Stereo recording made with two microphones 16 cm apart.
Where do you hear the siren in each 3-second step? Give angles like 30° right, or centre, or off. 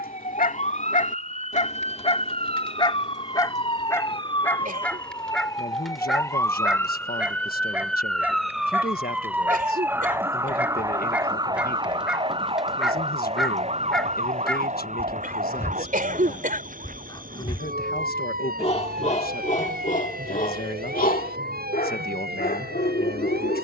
40° left, 30° left, 10° left, 20° right, 40° right, 50° right, 60° right, 70° right.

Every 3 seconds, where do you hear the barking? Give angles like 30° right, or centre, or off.
50° left, 10° left, 10° right, 10° right, centre, 30° left, 50° left, 70° left.